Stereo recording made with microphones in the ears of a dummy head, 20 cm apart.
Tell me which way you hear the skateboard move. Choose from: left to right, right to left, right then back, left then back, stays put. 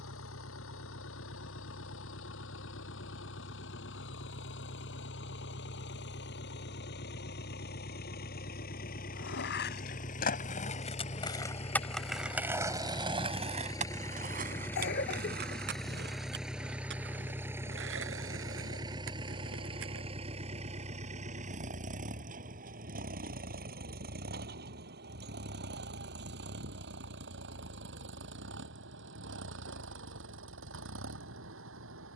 left to right.